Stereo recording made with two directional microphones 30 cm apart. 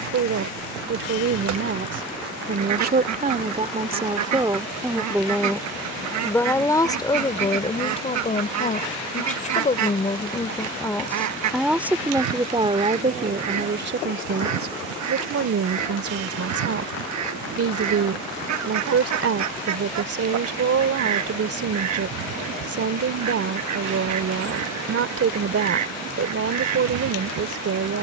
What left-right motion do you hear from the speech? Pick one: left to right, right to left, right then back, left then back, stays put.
left then back.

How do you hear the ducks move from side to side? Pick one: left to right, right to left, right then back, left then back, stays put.
stays put.